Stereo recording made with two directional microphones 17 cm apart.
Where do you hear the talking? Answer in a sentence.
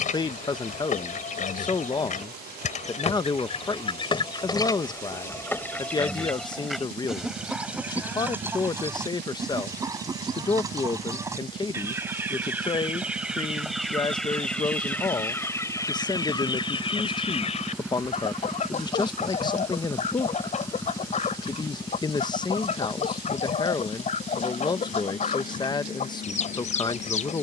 You can hear the talking on the left.